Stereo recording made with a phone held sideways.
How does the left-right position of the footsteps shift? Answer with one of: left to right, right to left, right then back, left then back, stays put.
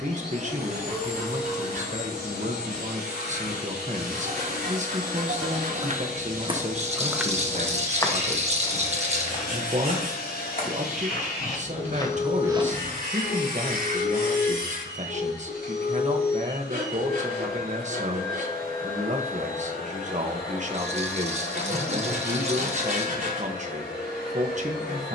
left then back.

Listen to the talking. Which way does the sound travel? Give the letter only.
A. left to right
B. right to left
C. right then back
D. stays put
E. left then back
D.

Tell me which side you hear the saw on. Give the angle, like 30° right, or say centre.
70° right.